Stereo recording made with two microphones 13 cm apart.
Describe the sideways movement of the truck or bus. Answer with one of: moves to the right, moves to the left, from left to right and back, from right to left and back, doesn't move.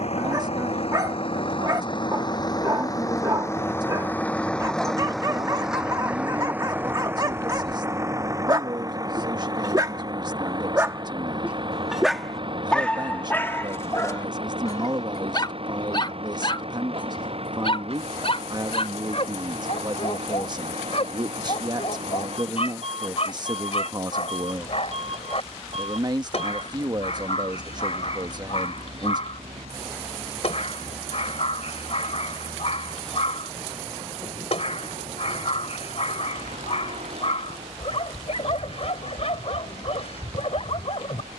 moves to the right.